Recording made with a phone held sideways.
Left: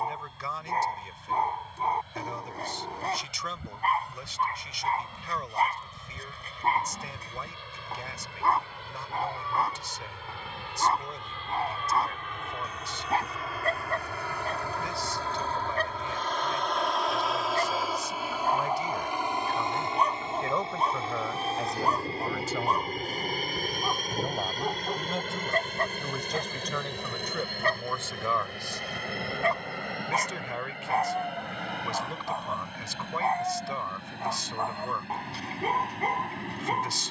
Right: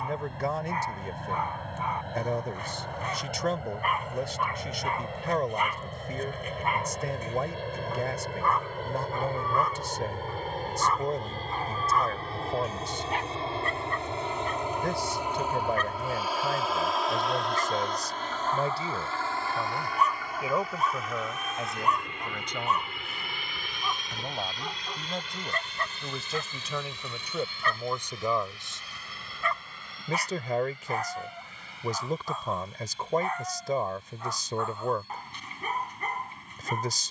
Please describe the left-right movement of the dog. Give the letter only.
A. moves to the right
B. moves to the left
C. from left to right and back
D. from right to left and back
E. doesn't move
E.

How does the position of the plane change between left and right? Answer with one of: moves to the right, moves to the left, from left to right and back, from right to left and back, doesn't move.
moves to the left.